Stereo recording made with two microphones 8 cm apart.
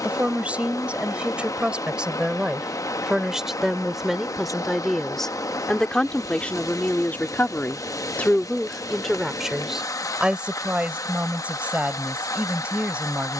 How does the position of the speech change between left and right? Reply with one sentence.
In this clip you hear the speech go left and come back.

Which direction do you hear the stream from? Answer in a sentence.
In this clip you hear the stream on the left.